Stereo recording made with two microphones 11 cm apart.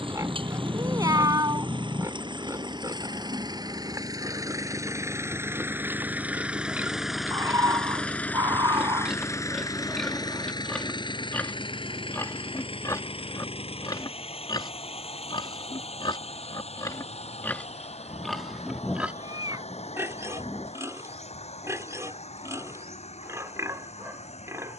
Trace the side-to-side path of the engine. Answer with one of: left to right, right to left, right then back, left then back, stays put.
right to left.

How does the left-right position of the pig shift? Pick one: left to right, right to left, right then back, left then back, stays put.
left then back.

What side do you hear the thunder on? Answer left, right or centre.
centre.